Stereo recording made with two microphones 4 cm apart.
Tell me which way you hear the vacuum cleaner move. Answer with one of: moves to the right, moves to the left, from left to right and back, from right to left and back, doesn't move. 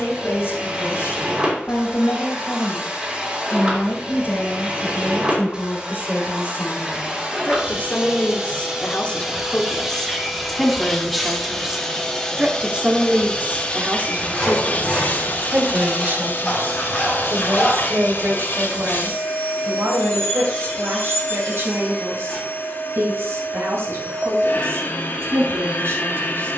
moves to the left.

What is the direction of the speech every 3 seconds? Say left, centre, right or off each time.
left, left, left, centre, right, right, right, right, right.